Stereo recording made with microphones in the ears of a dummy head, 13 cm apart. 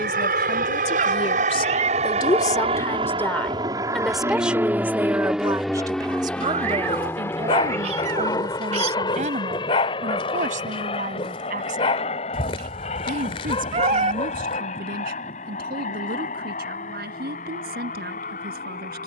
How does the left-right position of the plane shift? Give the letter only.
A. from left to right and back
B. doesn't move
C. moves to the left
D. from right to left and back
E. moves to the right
C.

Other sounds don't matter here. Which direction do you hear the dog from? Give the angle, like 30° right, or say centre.
40° left.